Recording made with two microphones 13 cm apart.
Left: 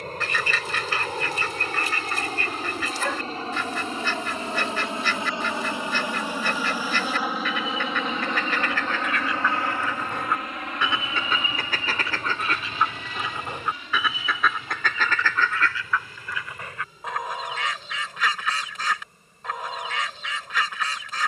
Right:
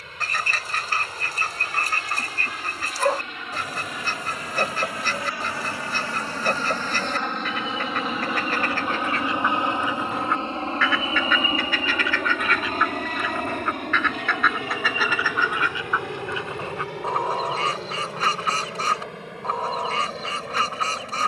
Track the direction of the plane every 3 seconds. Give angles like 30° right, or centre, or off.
40° left, 30° left, centre, 30° right, 50° right, 70° right, 70° right.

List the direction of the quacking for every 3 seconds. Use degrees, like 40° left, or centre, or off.
40° right, 40° right, 40° right, 10° left, 20° left, 30° right, 40° right.